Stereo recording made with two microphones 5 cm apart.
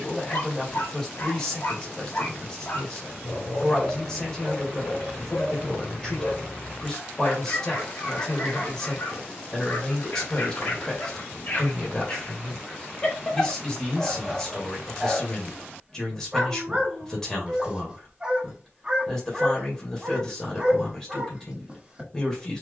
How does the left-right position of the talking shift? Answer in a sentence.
You can hear the talking stay in one place.